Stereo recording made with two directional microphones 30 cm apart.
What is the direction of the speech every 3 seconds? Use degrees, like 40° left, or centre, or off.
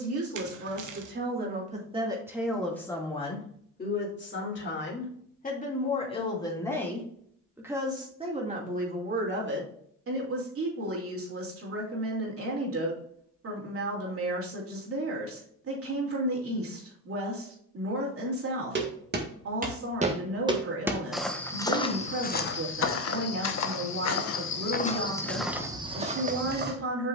30° right, 30° left, 10° right, 40° right, 50° right, 50° right, 50° right, 50° right, 50° right.